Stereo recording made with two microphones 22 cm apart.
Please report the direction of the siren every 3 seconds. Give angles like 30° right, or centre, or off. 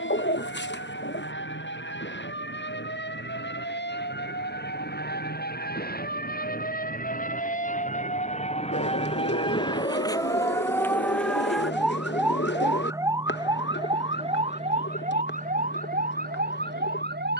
60° left, 50° left, 40° left, 10° left, 20° right, 40° right.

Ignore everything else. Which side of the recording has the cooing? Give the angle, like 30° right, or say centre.
60° left.